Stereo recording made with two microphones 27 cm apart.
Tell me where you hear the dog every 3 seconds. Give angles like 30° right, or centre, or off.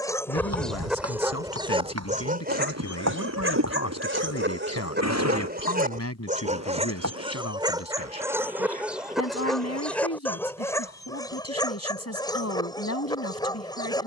10° right, 40° right, 20° right, 10° left, 20° left.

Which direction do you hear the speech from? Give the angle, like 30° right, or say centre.
70° left.